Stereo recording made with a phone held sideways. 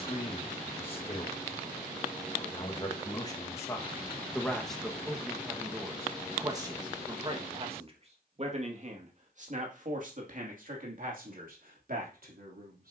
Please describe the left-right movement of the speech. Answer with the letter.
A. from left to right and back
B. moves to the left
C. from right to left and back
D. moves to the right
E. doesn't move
D.